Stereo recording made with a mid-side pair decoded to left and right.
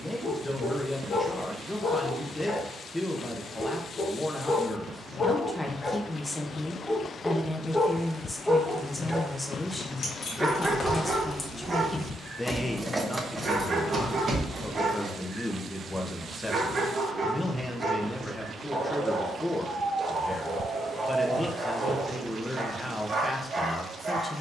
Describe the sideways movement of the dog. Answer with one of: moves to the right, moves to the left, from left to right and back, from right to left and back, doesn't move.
moves to the right.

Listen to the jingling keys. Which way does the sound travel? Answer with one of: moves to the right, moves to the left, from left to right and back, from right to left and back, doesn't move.
moves to the right.